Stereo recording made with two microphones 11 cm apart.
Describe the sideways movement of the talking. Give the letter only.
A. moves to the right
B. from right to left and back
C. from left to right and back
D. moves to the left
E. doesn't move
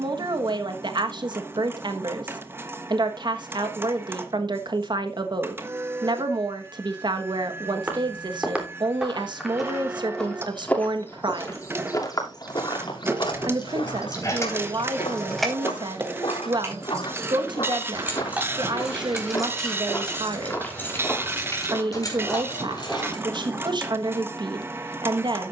E.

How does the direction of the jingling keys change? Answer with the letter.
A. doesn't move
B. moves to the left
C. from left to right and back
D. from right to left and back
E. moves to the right
C.